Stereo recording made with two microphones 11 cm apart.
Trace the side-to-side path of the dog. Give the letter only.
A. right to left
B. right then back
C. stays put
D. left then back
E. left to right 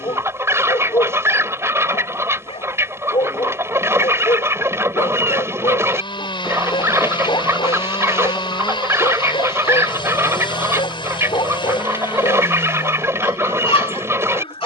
C.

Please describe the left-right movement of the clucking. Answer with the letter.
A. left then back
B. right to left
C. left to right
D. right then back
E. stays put
E.